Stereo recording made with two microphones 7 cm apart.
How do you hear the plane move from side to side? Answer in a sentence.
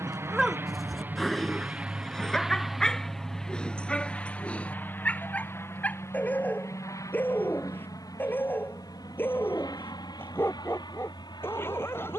You can hear the plane go from the right side to the left.